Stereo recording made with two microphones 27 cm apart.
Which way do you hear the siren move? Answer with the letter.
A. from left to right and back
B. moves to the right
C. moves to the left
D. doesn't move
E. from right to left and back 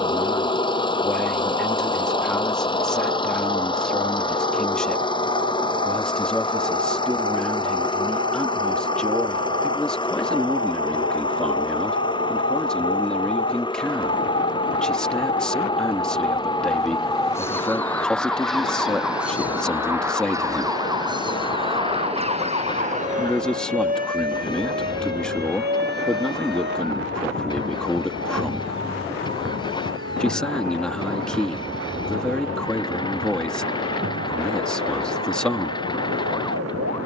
B.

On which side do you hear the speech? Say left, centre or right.
centre.